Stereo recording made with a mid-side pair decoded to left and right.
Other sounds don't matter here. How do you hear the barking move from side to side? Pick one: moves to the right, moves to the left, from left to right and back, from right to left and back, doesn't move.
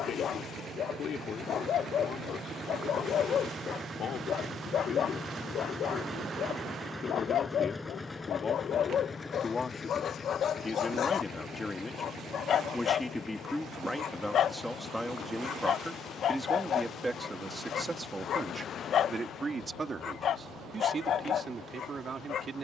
doesn't move.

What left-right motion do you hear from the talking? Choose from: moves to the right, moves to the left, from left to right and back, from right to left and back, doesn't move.
moves to the right.